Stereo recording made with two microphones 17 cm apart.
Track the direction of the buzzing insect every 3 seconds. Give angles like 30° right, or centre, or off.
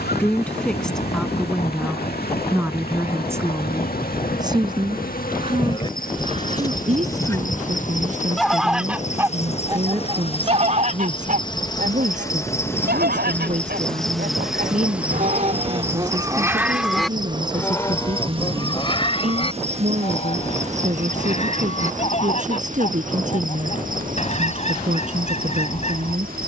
70° left, 60° left, 50° left, 30° left, 10° left, 20° right, 40° right, 50° right, 60° right.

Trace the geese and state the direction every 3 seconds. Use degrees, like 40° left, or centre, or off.
40° left, 40° left, 10° left, 40° right, 70° right, 20° right, 30° left, 40° left, 40° left.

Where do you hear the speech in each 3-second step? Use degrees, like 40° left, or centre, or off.
centre, 20° right, 40° right, 50° right, 50° right, 50° right, 50° right, 50° right, 50° right.